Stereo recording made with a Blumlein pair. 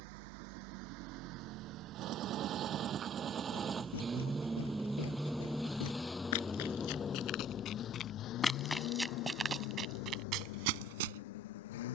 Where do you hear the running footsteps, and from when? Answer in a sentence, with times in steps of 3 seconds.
You can hear the running footsteps not at all from 0 s, on the left from 3 s and on the right from 9 s.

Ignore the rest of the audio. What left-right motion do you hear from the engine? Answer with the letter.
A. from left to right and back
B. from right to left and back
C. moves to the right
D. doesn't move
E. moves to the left
E.